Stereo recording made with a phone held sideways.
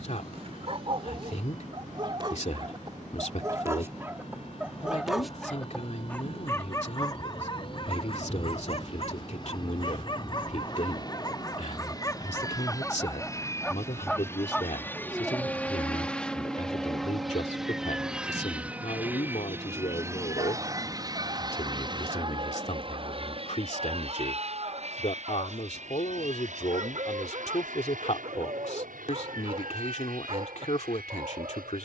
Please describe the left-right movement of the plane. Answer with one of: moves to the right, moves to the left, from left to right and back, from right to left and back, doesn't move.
moves to the right.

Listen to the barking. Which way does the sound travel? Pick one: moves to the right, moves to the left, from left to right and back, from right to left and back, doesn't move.
from right to left and back.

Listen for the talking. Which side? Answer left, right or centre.
left.